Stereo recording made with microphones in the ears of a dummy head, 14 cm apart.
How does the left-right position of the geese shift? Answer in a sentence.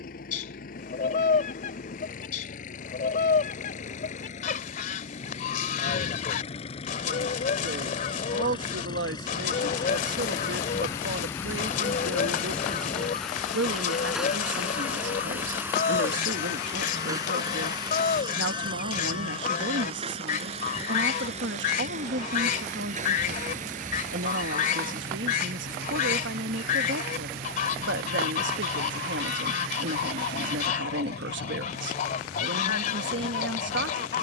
You can hear the geese stay in one place.